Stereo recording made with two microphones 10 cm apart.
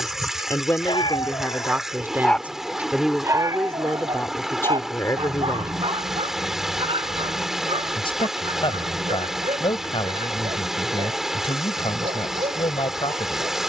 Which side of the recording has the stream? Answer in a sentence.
You can hear the stream in the centre.